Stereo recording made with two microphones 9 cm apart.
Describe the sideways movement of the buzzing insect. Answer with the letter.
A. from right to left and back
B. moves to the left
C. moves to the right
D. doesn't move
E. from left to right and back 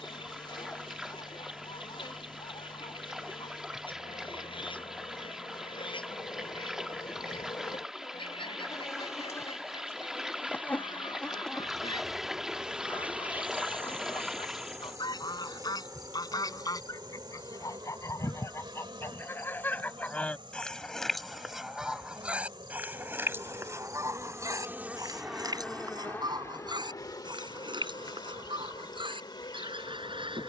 E.